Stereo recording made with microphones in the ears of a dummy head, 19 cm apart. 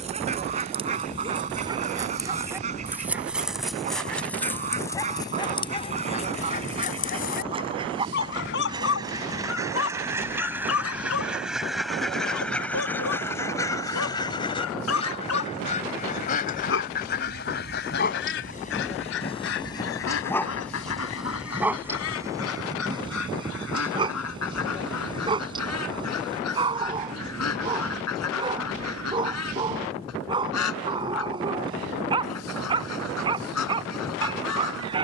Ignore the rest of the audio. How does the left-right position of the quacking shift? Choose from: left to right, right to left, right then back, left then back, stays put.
right to left.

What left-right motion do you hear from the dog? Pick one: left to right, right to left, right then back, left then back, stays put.
left then back.